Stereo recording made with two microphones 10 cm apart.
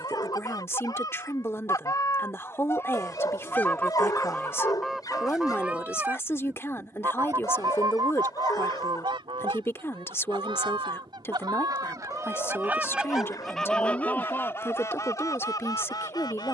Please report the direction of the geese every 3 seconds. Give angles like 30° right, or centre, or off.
40° left, 10° left, 40° right, 60° right, centre, 40° left.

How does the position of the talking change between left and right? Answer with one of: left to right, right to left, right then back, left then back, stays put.
stays put.